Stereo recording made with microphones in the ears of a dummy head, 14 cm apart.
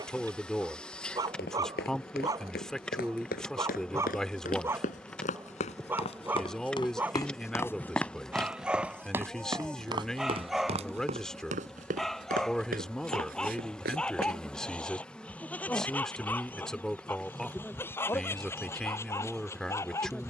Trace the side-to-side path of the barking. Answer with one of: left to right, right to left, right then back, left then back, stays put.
right to left.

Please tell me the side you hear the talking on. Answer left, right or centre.
centre.